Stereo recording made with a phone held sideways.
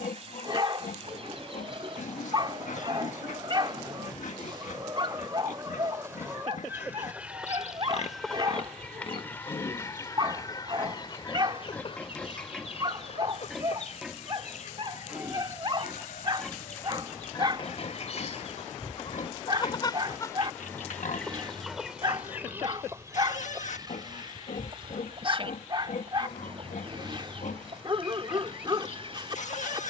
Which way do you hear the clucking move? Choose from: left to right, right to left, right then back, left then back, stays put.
left then back.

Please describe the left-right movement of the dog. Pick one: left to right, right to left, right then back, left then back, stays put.
stays put.